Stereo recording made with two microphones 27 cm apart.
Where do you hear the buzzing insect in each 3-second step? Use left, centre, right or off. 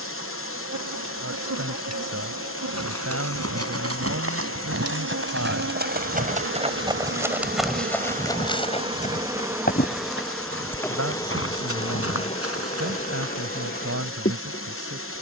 right, right, right, centre, left.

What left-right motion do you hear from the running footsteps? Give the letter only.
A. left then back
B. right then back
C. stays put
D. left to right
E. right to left
E.